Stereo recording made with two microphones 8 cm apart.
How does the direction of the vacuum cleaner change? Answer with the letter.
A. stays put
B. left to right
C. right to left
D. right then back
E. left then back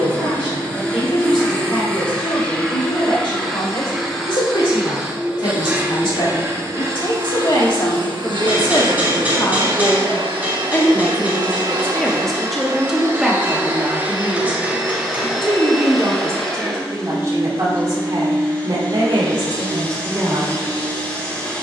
D.